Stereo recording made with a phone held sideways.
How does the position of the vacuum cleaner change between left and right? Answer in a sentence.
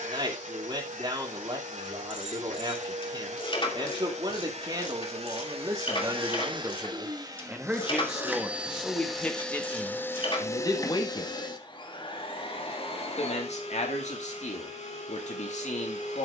You can hear the vacuum cleaner move from right to left.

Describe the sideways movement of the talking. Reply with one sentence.
You can hear the talking travel towards the left.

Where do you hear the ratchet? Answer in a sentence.
You can hear the ratchet on the left.